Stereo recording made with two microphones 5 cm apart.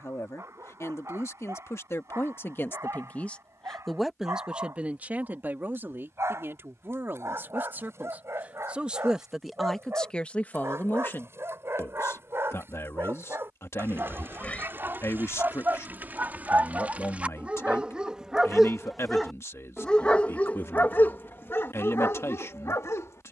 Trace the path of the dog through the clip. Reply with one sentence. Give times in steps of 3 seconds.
You can hear the dog on the right from 0 s, in the centre from 18 s and on the left from 21 s.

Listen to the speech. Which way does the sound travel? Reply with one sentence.
In this clip you hear the speech move from left to right and back again.